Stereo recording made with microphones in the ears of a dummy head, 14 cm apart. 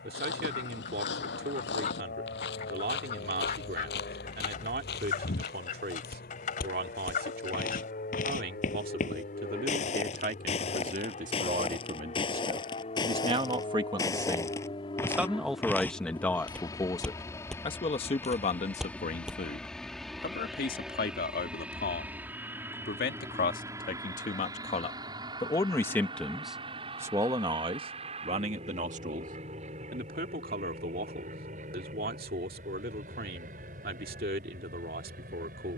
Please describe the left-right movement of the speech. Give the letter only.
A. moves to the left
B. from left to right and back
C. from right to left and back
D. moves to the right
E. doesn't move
C.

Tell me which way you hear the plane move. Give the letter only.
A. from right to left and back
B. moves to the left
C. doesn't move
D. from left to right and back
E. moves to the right
E.